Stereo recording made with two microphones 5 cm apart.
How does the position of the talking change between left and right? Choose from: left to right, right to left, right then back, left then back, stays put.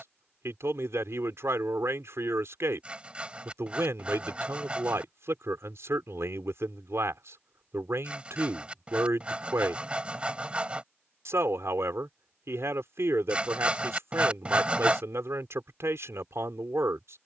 stays put.